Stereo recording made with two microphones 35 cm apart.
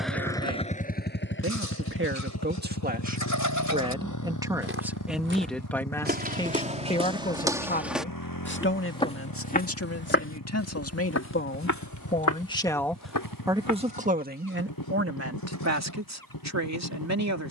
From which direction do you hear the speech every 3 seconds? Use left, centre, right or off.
right, centre, left, left, centre, right.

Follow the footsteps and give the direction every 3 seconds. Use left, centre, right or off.
off, right, centre, left, left, off.